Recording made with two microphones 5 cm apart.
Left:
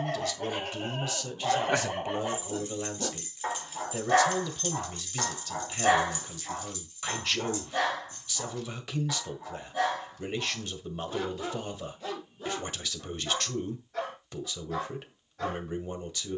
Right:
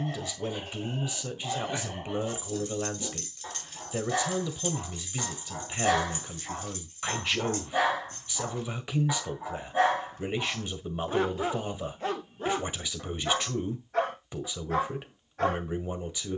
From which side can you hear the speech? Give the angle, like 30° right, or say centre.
20° right.